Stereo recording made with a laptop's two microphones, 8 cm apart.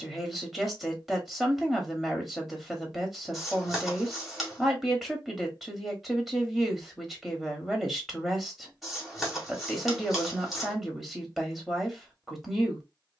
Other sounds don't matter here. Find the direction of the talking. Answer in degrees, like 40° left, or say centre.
centre.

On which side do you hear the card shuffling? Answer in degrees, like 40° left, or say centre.
centre.